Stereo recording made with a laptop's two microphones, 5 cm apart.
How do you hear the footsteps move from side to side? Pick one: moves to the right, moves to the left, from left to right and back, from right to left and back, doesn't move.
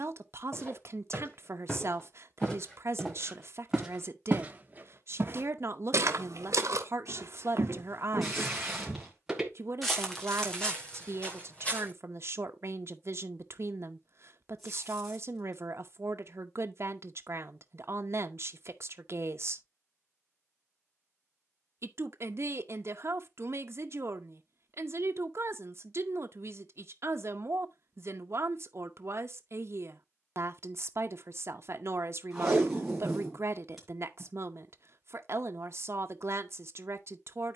from left to right and back.